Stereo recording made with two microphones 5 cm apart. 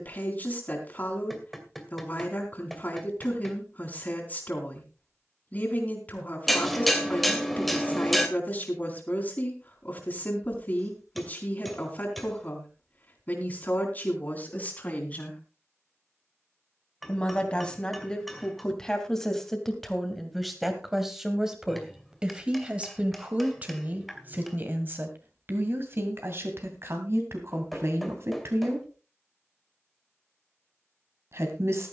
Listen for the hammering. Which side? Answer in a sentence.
In this clip you hear the hammering in the centre.